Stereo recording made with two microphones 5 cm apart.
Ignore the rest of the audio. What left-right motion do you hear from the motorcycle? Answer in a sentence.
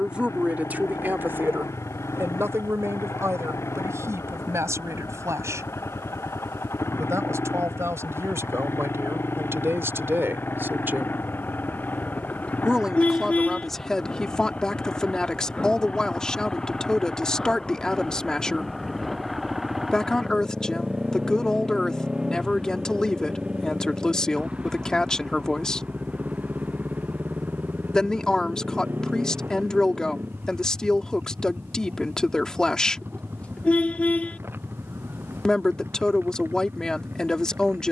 In this clip you hear the motorcycle travel towards the right.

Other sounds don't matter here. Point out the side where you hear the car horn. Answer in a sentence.
In this clip you hear the car horn on the left.